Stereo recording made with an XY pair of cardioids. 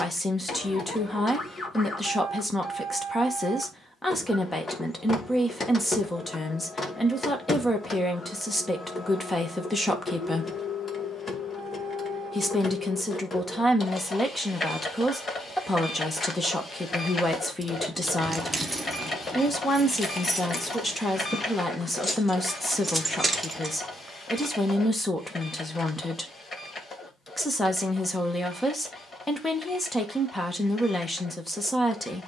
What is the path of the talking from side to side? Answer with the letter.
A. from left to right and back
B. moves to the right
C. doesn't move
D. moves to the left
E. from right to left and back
C.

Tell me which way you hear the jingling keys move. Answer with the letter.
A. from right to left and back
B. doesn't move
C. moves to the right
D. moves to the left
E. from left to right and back
A.